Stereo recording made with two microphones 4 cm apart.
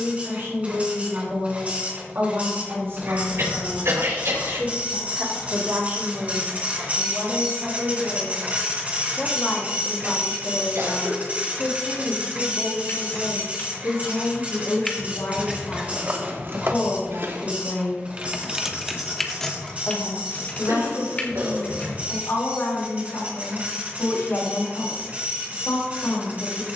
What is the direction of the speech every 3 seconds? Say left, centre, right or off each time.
right, right, right, left, left, left, left, left, left.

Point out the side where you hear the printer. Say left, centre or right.
right.